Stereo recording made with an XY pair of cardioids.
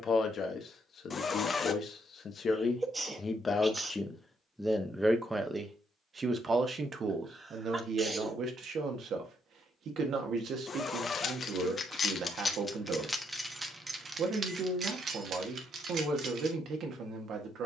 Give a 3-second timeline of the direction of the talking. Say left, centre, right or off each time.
left, centre, right, right, right, right.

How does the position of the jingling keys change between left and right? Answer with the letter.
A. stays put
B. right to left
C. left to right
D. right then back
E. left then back
C.